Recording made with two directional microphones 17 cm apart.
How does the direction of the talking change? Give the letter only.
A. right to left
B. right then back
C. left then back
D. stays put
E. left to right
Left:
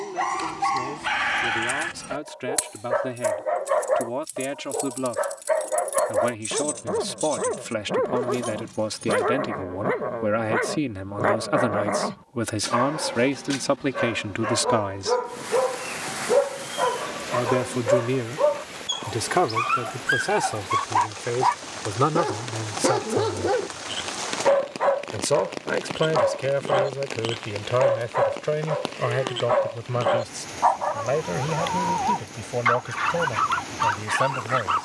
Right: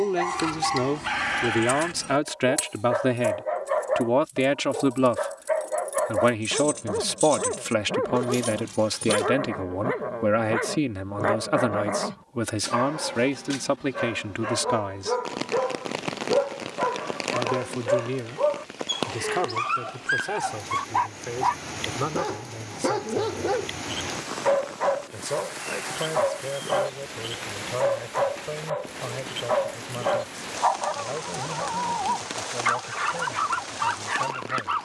A.